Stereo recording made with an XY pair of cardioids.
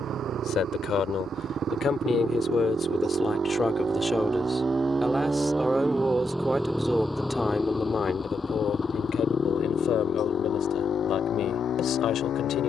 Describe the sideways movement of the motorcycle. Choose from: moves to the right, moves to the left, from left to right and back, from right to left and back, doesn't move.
moves to the left.